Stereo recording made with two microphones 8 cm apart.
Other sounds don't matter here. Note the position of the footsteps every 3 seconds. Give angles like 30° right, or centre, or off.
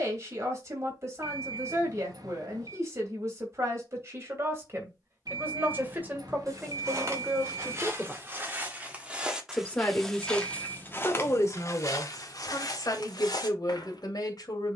off, off, 40° right, 20° left, 60° left.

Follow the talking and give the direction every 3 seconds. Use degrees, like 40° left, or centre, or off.
40° right, 40° right, 20° right, 30° left, 60° left.